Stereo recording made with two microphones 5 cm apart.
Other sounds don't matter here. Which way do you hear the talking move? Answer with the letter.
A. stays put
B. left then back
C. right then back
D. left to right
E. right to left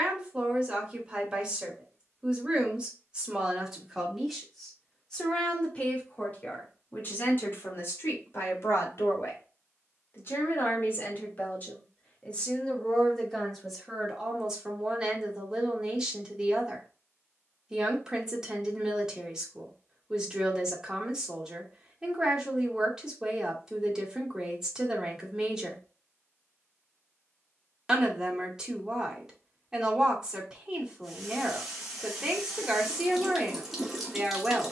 B.